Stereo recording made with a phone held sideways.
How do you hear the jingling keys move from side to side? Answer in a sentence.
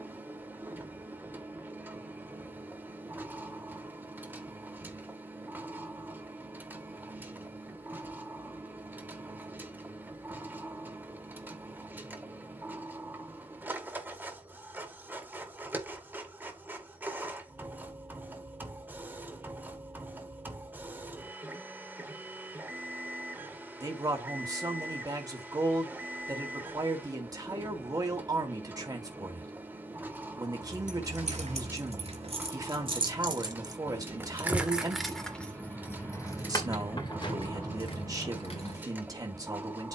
In this clip you hear the jingling keys travel towards the left.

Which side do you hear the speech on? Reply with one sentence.
You can hear the speech on the right.